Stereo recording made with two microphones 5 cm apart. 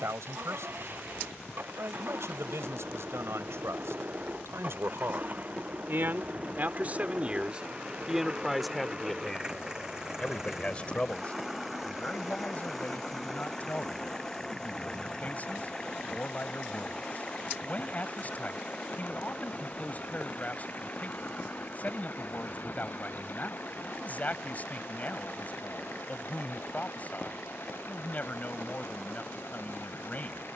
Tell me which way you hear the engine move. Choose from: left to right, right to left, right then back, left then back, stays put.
right to left.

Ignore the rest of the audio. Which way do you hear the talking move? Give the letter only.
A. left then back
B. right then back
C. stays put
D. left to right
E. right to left
E.